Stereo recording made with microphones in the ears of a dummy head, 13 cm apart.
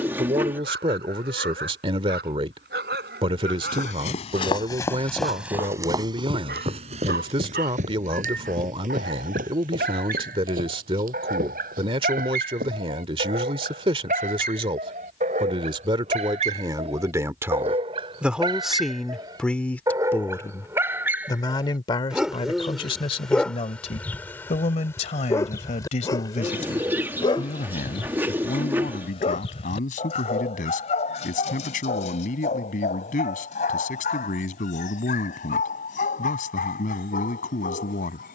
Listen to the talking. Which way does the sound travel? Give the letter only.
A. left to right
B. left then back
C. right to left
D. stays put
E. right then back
C.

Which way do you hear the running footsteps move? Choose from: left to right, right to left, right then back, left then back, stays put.
left to right.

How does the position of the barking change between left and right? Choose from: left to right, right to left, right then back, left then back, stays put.
right to left.